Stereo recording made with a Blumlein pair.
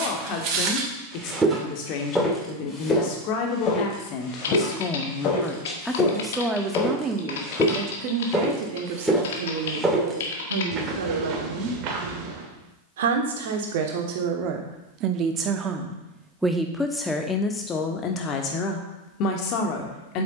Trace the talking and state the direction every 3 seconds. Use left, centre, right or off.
left, left, right, right, right, centre, left.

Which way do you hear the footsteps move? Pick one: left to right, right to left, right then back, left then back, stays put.
left then back.